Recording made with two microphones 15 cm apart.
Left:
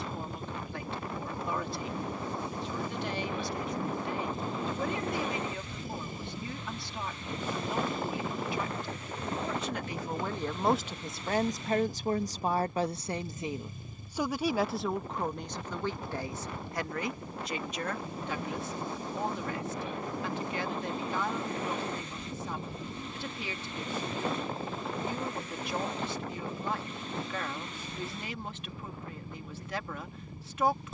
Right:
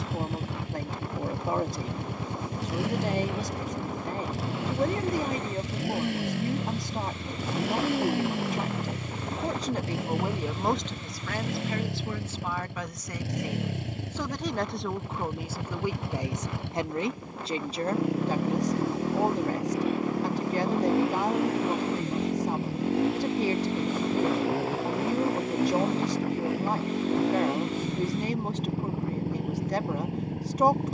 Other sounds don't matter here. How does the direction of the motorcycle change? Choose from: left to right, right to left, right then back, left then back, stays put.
stays put.